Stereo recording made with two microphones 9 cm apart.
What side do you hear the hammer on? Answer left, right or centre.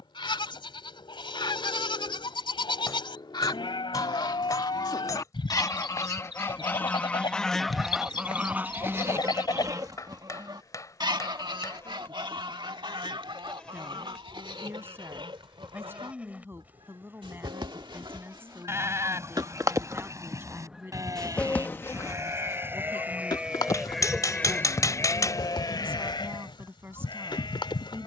left.